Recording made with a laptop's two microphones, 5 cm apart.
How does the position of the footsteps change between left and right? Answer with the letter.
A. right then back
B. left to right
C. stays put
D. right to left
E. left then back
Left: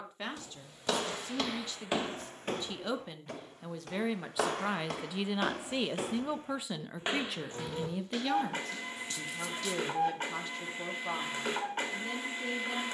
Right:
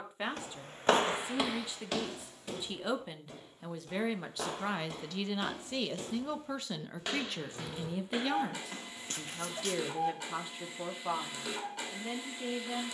E.